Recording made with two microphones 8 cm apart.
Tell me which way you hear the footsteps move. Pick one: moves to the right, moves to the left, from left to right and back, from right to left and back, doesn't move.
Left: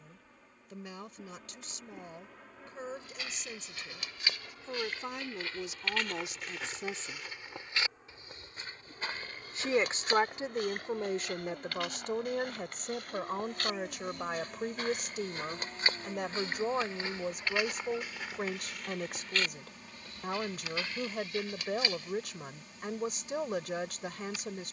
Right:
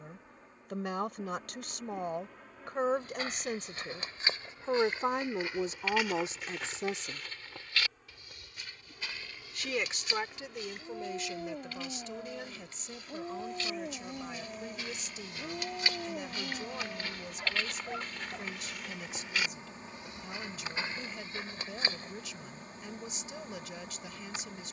from right to left and back.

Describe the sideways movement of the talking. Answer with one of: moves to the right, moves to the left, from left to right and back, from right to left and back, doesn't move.
moves to the left.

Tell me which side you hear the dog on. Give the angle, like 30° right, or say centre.
50° right.